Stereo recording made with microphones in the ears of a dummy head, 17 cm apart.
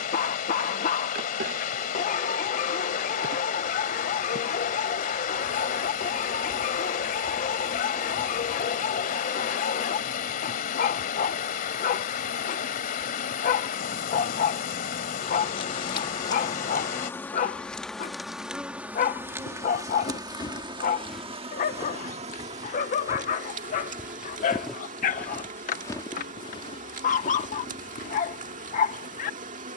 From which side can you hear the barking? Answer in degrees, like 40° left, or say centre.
40° left.